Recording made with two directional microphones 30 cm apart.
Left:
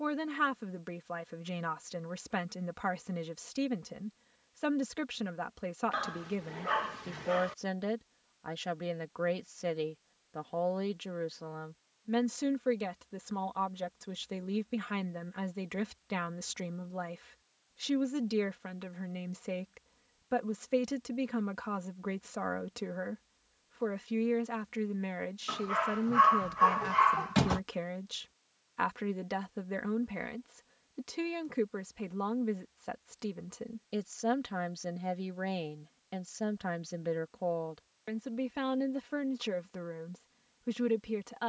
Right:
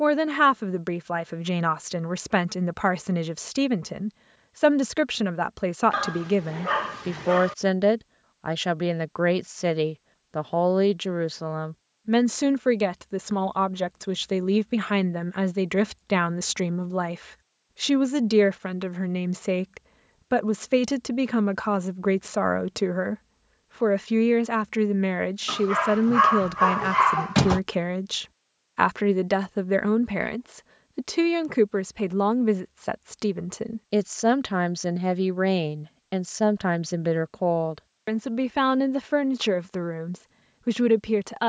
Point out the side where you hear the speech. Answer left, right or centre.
right.